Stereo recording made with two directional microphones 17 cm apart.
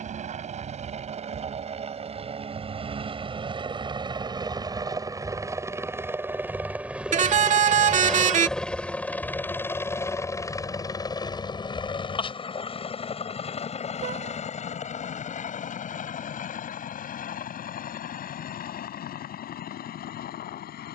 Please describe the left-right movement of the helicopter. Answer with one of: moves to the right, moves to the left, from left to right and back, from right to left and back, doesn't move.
moves to the left.